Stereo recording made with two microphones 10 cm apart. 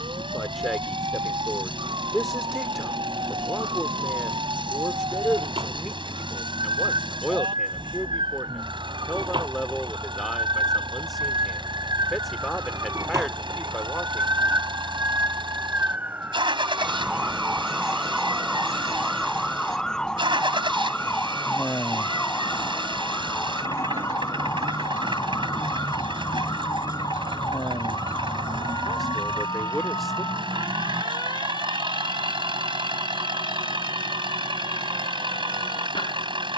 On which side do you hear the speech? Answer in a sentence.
You can hear the speech in the centre.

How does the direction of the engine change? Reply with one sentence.
You can hear the engine stay put.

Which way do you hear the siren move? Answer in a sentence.
In this clip you hear the siren move from right to left.